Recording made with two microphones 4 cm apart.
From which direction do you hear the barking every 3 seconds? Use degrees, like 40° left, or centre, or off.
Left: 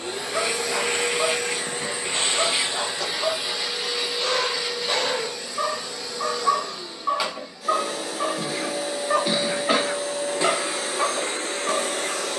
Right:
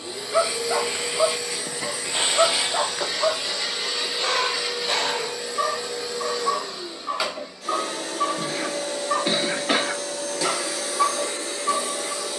20° right, centre, 30° left, 40° left.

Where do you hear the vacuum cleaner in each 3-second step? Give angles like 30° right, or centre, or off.
40° left, centre, centre, 30° left.